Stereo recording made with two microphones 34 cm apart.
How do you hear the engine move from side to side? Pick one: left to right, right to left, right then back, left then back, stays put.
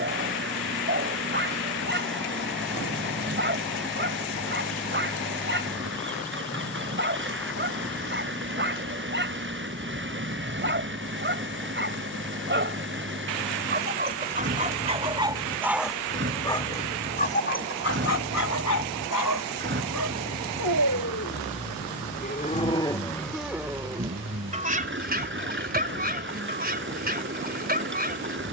stays put.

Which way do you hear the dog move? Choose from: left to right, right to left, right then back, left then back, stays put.
left then back.